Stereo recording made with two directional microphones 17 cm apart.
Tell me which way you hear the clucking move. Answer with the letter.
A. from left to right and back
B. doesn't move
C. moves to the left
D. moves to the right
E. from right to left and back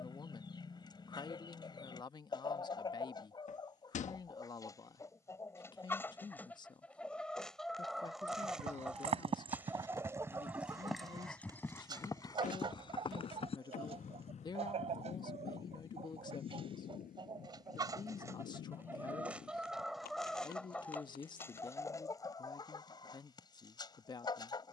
A.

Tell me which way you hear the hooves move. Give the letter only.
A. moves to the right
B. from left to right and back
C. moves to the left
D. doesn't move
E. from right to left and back
C.